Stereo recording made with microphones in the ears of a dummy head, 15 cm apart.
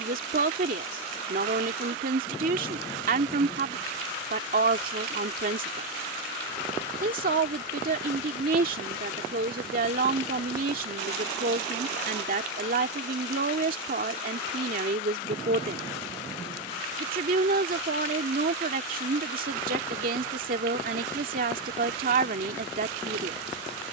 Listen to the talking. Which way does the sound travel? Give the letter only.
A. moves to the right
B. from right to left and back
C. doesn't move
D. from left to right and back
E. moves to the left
C.